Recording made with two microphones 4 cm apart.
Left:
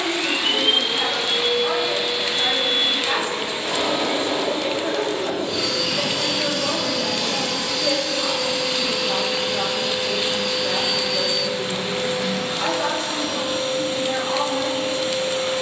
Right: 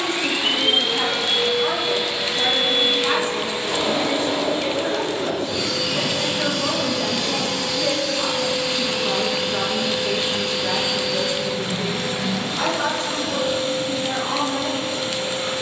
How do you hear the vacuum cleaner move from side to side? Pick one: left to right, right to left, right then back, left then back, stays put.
stays put.